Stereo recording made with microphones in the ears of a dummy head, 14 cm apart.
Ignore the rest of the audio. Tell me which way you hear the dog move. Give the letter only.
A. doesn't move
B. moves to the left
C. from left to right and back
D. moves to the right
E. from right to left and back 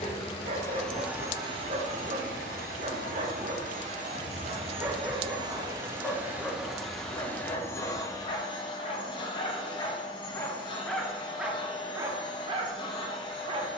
E.